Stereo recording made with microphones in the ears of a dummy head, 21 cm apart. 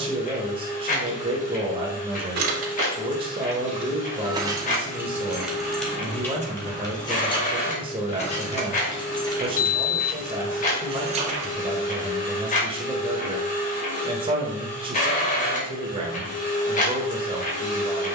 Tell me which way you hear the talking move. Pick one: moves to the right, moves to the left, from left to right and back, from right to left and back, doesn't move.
doesn't move.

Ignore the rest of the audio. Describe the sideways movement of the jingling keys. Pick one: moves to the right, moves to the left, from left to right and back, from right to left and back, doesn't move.
from right to left and back.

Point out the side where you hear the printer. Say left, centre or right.
left.